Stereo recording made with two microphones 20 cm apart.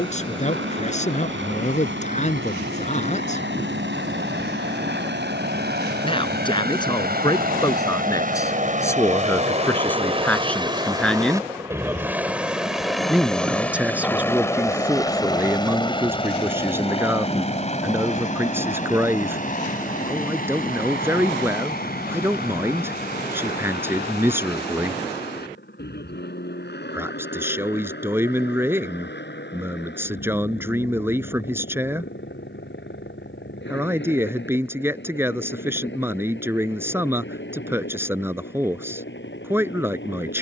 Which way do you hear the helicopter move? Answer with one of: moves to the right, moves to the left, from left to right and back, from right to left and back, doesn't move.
moves to the left.